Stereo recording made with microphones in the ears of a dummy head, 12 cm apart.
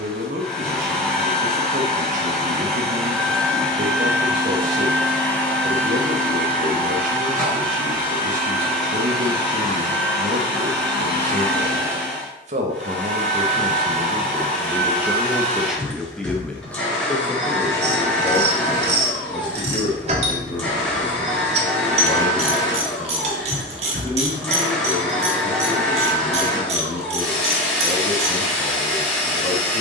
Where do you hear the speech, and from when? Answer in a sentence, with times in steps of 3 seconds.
You can hear the speech on the right from 0 s, in the centre from 15 s and on the left from 18 s.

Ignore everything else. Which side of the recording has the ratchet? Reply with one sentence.
You can hear the ratchet on the right.